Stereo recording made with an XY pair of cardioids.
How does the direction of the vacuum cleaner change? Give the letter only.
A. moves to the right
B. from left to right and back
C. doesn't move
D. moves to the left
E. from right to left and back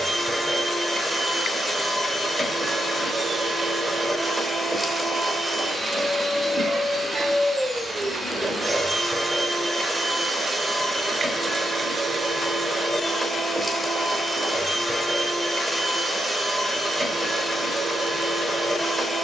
C.